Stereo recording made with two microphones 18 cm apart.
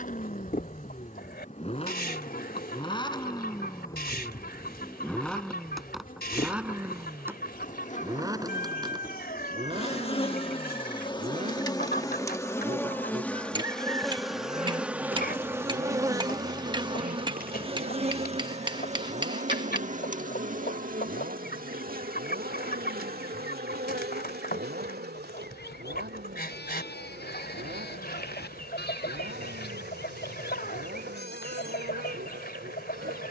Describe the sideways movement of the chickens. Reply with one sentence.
In this clip you hear the chickens stay put.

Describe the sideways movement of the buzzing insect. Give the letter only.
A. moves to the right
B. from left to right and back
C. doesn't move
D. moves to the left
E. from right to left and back
A.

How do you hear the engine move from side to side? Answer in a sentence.
In this clip you hear the engine move from left to right.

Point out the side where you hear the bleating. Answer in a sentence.
You can hear the bleating on the left.